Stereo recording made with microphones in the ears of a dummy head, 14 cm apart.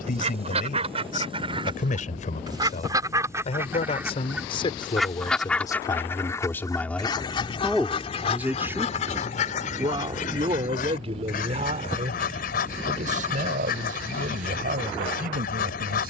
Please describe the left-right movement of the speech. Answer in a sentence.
You can hear the speech move from left to right.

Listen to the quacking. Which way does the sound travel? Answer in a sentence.
In this clip you hear the quacking travel towards the left.